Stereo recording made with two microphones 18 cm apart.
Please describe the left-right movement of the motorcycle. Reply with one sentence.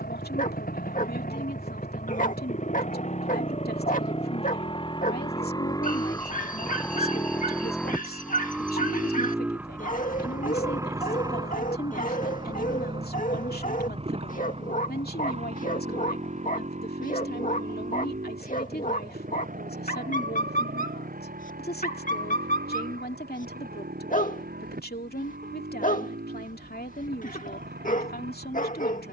In this clip you hear the motorcycle move from left to right.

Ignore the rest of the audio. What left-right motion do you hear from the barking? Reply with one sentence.
You can hear the barking stay in one place.